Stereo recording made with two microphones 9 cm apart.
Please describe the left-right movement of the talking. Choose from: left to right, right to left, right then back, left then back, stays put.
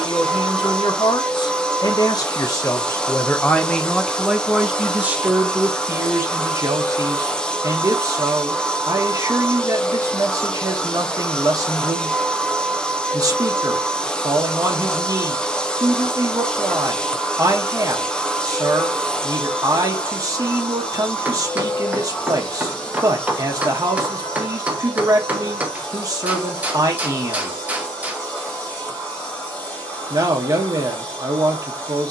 left to right.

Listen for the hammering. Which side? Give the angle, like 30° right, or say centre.
20° right.